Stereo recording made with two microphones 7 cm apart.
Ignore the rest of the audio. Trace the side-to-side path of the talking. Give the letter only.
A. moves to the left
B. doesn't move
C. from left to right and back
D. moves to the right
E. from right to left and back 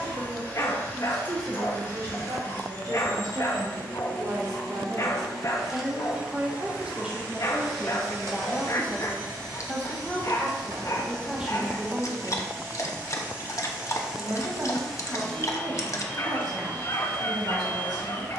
E.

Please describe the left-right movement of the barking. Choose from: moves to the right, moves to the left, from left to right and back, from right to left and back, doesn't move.
doesn't move.